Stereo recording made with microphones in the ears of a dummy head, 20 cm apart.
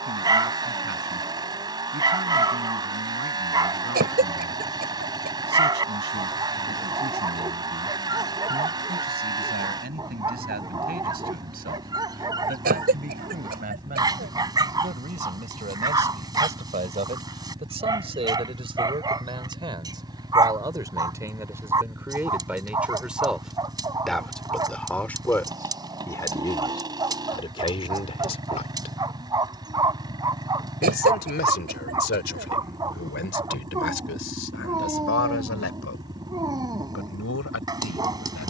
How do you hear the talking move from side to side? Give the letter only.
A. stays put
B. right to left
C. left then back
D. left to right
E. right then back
B.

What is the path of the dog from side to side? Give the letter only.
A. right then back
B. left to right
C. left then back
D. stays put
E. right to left
D.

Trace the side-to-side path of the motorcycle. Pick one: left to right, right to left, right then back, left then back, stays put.
stays put.